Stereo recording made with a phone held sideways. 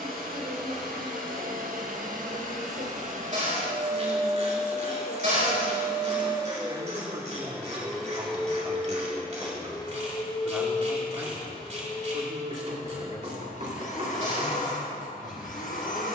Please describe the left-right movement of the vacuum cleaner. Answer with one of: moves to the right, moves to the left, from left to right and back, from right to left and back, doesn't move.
moves to the left.